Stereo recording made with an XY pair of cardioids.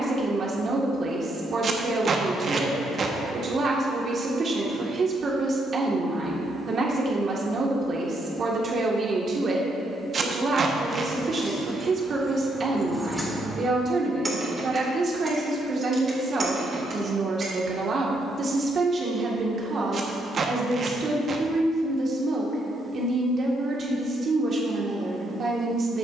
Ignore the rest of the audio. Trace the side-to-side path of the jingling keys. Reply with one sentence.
In this clip you hear the jingling keys move to the right.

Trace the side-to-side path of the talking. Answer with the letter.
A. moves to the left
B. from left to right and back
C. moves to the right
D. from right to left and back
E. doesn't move
E.